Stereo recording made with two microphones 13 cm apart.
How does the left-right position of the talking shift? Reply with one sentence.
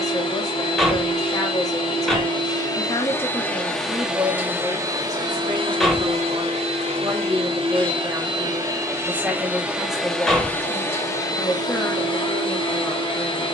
You can hear the talking go right and come back.